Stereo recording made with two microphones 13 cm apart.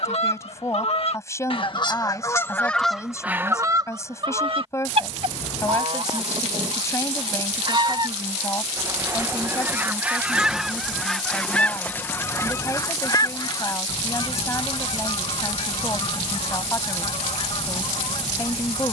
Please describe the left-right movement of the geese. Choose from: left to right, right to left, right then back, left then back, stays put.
right then back.